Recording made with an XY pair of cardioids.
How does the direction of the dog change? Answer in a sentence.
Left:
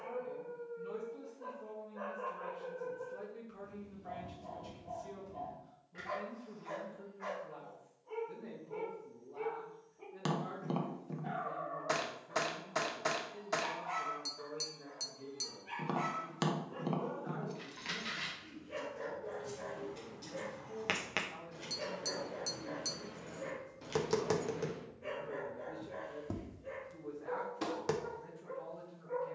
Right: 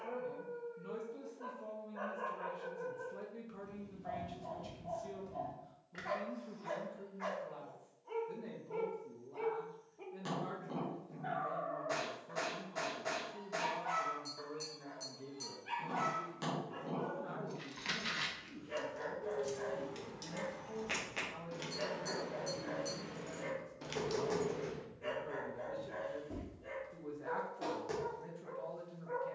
You can hear the dog stay put.